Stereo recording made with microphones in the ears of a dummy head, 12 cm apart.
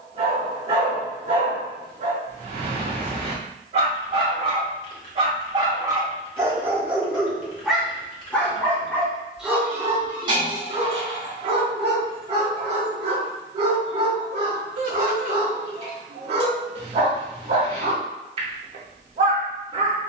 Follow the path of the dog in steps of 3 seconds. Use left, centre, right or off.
right, right, centre, right, right, right, right.